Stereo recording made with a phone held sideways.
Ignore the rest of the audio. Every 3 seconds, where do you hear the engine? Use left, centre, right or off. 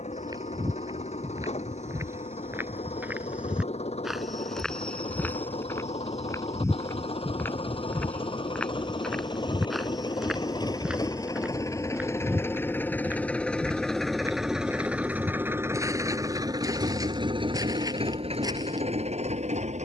left, left, left, left, centre, right, right.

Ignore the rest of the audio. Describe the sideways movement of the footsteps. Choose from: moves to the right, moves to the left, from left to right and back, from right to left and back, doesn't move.
from right to left and back.